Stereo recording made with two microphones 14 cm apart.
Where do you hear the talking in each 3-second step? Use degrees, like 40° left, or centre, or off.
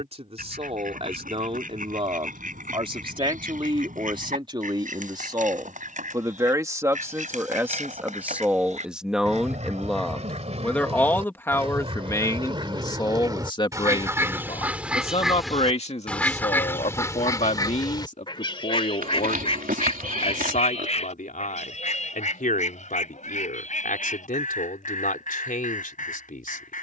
40° right, 30° right, 20° right, 10° left, 30° left, 50° left, 60° left, 70° left, 70° left.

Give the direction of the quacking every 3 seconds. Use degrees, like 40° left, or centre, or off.
70° right, 70° right, 60° right, 50° right, 30° right, 10° left, 40° left, 60° left, 70° left.